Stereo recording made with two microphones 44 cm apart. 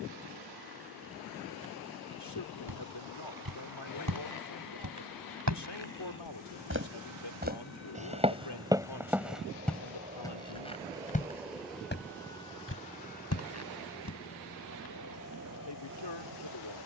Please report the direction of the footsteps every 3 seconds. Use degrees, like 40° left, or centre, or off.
off, 40° right, 10° right, 10° left, 30° left, off.